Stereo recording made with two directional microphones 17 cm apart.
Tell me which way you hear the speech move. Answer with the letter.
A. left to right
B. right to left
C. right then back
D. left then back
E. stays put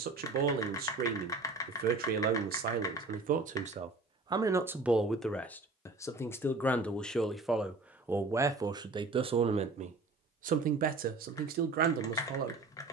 D.